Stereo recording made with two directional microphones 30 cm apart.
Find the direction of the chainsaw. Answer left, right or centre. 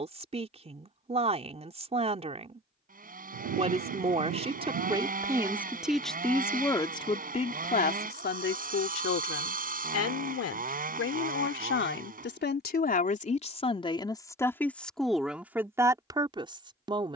right.